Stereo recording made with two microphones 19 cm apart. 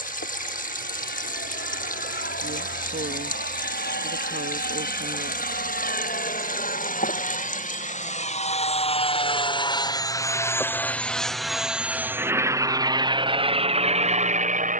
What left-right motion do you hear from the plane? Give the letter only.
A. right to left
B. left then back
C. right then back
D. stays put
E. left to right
E.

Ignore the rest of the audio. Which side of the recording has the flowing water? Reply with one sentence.
In this clip you hear the flowing water on the left.